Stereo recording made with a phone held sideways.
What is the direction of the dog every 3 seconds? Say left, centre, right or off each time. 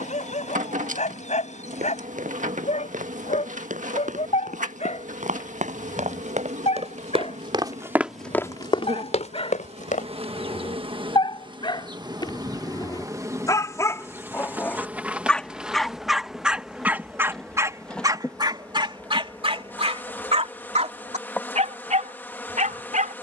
left, left, left, left, left, centre, right, right.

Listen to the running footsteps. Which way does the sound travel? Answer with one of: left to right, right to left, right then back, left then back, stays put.
right to left.